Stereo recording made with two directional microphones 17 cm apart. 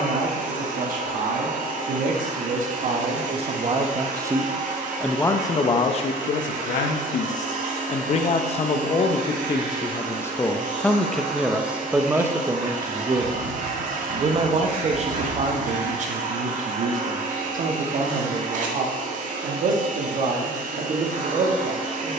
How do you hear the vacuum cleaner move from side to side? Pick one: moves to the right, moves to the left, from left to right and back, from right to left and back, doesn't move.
doesn't move.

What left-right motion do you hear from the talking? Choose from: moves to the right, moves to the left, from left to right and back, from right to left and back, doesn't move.
from right to left and back.